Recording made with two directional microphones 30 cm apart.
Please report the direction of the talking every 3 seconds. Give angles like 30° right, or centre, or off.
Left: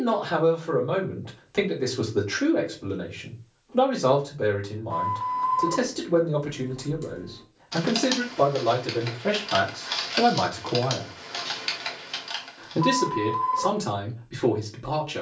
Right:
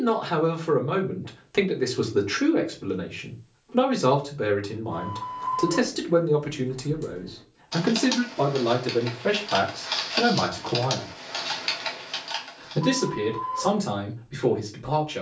20° right, 20° right, 20° right, centre, 30° left.